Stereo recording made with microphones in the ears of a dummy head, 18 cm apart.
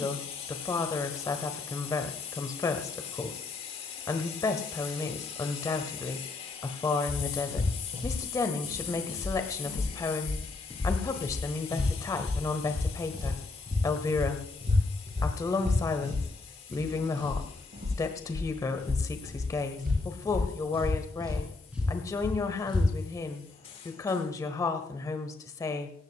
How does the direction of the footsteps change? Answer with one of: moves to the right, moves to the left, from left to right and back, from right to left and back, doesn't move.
from left to right and back.